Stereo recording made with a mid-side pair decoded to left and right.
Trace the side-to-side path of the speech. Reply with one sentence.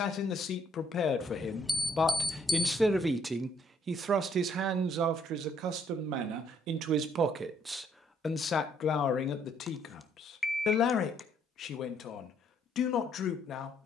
In this clip you hear the speech go right and come back.